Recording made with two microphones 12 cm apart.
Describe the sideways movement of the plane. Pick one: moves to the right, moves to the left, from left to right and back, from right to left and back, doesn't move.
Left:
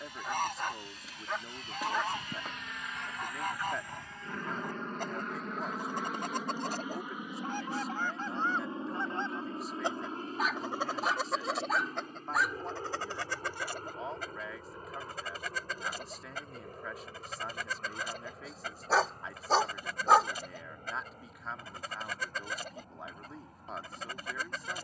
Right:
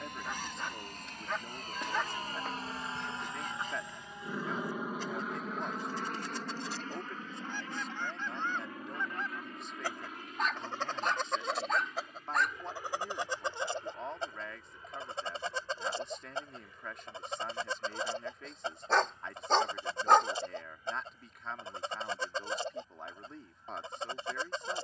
moves to the left.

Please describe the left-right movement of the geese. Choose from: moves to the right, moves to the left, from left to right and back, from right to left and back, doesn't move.
moves to the right.